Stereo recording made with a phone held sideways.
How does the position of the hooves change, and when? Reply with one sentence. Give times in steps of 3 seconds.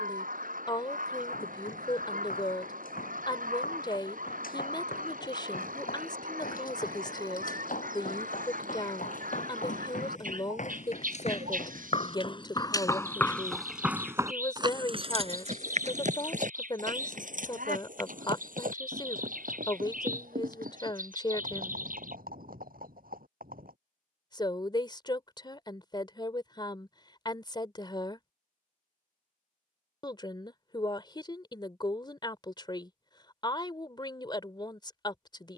You can hear the hooves on the left from 0 s, in the centre from 12 s, on the right from 15 s and not at all from 24 s.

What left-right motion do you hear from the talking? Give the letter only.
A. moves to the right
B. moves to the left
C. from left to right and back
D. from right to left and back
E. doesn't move
E.